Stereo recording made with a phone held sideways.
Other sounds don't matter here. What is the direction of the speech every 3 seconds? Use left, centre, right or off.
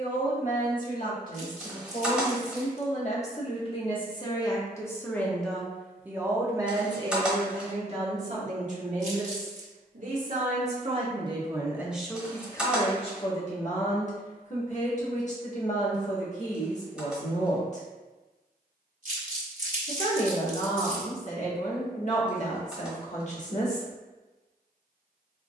left, left, right, right, left, left, left, left, off.